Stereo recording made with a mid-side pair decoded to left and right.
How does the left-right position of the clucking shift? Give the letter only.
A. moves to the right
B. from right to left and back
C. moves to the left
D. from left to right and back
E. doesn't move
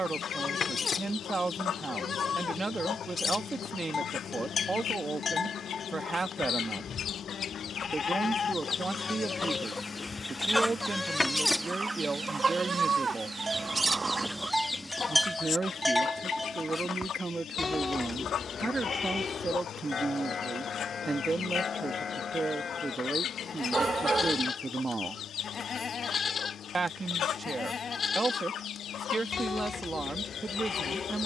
D.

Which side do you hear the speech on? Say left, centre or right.
right.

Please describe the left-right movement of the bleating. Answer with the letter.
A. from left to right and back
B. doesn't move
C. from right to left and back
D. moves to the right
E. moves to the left
A.